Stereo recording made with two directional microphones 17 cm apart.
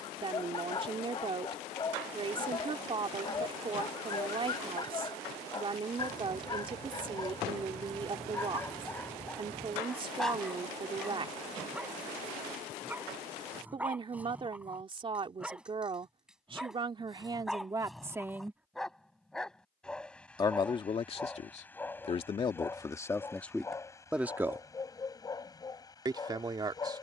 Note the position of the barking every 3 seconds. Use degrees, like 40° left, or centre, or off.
30° left, 30° left, 20° left, centre, 10° right, centre, centre, 10° left, 20° left.